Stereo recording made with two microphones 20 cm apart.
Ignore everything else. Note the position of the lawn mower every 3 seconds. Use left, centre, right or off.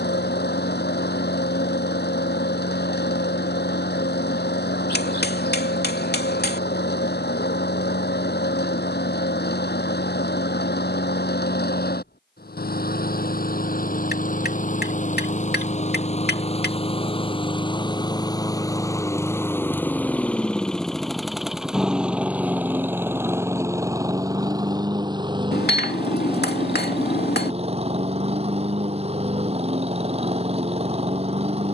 left, left, left, left, left, left, centre, centre, right, right, right.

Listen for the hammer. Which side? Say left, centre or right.
left.